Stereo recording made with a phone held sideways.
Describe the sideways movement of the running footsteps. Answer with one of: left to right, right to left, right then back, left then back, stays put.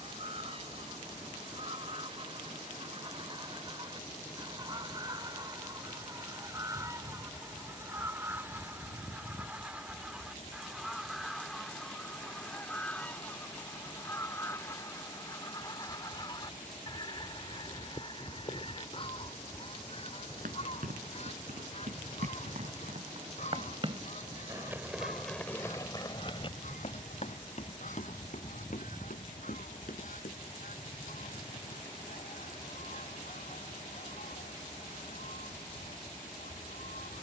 right to left.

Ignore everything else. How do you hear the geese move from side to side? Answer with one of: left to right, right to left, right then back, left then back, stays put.
right to left.